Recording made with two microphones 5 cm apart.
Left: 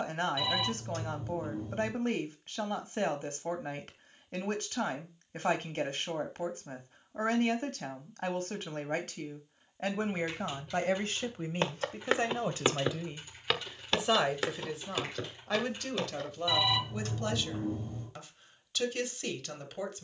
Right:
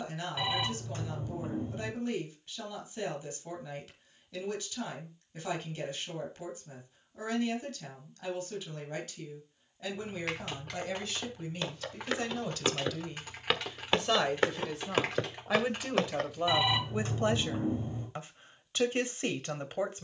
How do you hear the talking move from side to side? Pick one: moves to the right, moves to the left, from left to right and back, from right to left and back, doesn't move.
moves to the right.